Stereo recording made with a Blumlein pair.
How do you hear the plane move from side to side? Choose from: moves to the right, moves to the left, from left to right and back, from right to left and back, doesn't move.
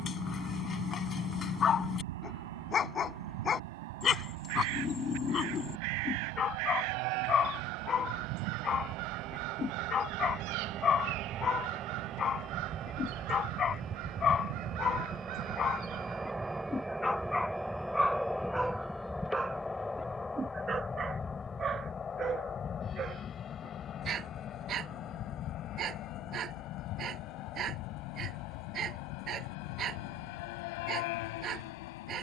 moves to the left.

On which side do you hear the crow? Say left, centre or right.
right.